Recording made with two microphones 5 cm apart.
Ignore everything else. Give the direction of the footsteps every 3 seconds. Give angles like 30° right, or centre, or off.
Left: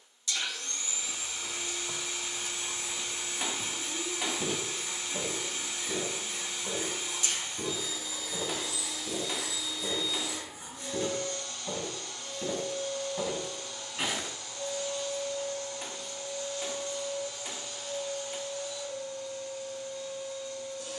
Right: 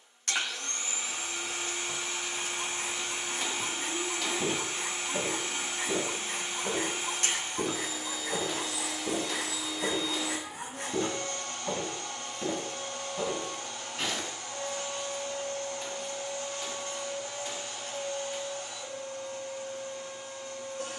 20° left, 20° right, 60° right, 40° right, centre, off, off.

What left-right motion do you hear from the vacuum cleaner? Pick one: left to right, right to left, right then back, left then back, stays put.
stays put.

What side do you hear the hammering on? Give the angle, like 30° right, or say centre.
20° left.